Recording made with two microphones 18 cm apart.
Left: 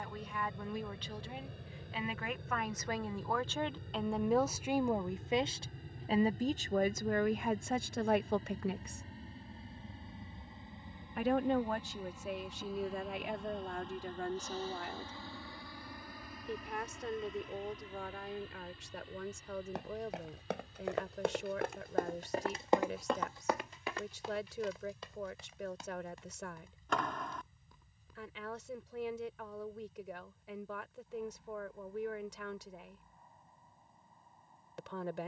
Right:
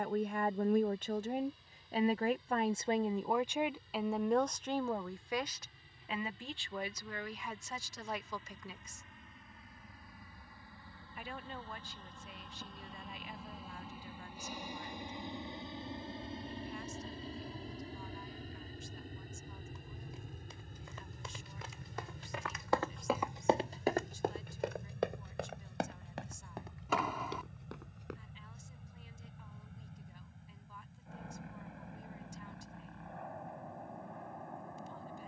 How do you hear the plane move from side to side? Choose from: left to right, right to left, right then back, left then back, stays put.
left to right.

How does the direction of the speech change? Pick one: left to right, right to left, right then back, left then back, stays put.
right to left.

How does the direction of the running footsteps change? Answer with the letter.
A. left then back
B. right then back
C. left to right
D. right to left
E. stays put
C.